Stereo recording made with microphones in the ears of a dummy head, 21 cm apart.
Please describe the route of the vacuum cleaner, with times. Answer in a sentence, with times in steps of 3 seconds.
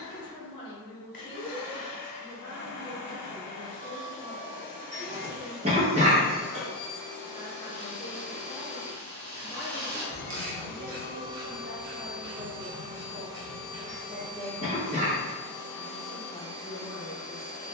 In this clip you hear the vacuum cleaner on the left from 0 s, on the right from 12 s and in the centre from 15 s.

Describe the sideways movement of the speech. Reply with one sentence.
In this clip you hear the speech go right and come back.